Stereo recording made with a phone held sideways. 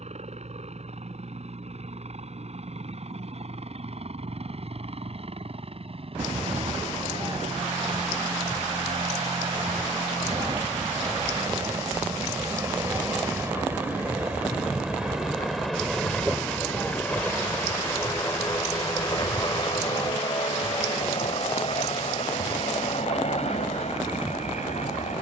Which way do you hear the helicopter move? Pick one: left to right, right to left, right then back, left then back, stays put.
right to left.